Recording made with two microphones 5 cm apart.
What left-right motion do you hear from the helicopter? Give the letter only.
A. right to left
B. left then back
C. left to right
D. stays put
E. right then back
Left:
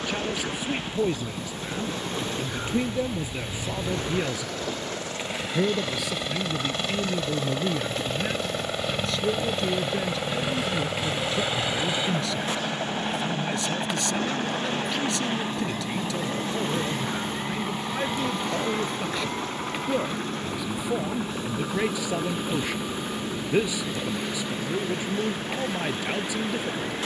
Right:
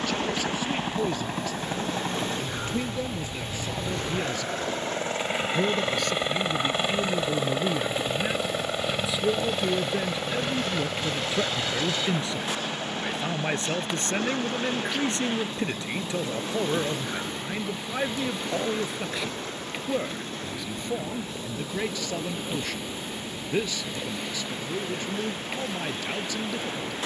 A.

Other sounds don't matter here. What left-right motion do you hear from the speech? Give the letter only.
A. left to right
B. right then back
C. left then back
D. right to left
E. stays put
B.